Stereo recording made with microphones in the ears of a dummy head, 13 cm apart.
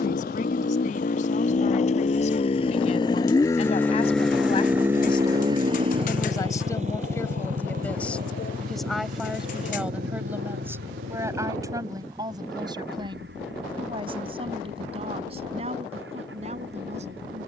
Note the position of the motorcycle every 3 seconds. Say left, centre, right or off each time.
left, centre, right, right, right, right.